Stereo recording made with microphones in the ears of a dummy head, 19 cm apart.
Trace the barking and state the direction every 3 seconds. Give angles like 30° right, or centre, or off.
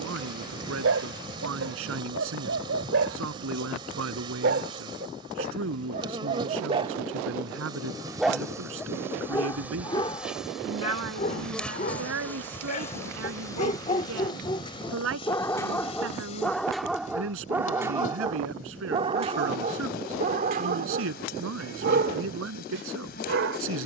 60° right, 50° right, 20° right, 30° left, 30° left, centre, 30° right, 50° right.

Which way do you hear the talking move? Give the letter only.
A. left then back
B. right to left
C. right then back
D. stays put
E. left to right
D.